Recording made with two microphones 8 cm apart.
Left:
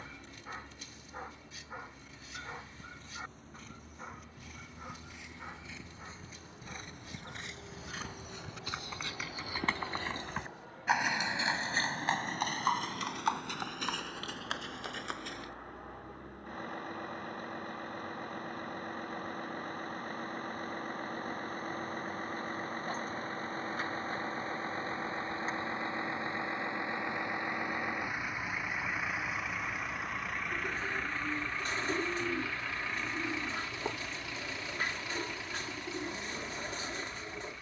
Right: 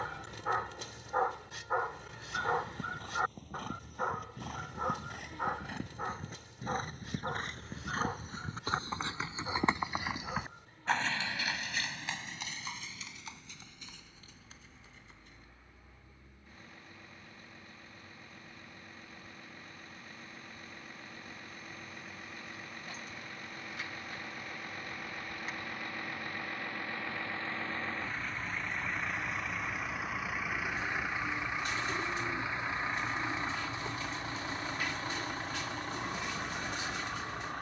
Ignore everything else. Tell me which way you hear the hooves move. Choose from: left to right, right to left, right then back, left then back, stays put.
right to left.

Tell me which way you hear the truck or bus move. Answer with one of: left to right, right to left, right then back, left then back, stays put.
left to right.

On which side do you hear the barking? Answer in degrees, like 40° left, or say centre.
60° right.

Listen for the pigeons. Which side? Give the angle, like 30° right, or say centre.
40° left.